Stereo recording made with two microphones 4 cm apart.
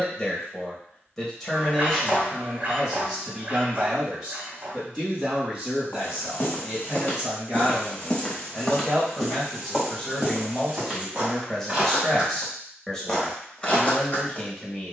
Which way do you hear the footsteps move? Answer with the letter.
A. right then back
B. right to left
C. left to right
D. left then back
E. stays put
A.